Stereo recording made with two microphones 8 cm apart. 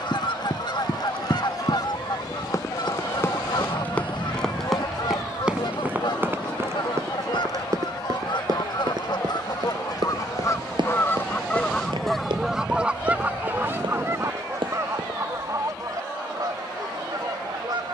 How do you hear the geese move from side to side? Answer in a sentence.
You can hear the geese go from the left side to the right.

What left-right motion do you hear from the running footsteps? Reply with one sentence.
In this clip you hear the running footsteps travel towards the right.